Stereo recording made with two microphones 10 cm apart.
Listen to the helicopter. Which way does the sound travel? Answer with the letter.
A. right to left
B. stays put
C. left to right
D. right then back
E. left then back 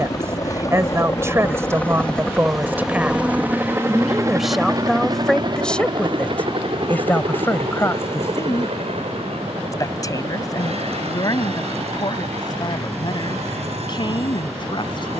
C.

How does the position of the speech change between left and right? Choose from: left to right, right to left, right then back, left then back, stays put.
right to left.